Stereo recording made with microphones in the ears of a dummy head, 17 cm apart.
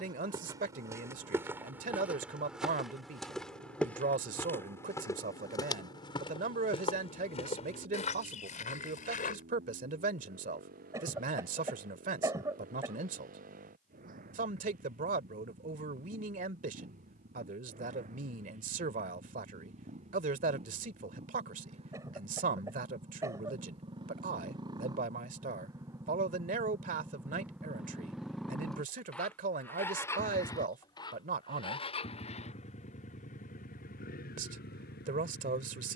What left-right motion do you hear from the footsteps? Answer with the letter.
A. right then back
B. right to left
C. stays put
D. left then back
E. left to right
B.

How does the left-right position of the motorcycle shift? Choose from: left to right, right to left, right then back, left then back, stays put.
right to left.